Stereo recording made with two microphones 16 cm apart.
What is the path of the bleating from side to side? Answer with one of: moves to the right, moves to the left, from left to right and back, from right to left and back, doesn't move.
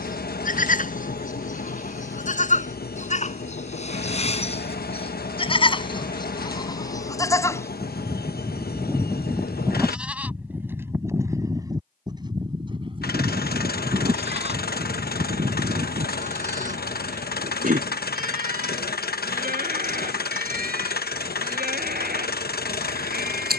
moves to the right.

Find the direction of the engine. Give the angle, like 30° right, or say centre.
70° left.